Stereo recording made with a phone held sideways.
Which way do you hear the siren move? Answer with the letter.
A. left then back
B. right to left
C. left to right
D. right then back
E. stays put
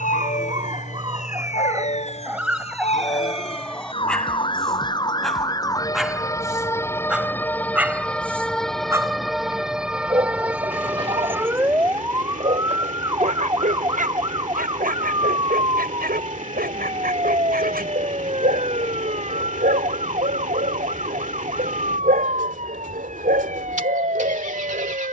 C.